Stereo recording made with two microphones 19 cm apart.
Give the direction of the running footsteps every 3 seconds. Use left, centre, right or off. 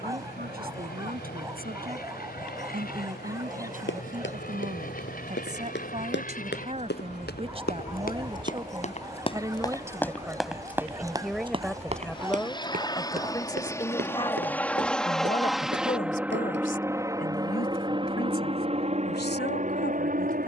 off, left, left, centre, right, right, off.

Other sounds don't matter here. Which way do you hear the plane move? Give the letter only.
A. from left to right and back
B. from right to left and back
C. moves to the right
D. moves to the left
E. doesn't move
C.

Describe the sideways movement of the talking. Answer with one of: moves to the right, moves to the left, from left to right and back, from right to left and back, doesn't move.
moves to the left.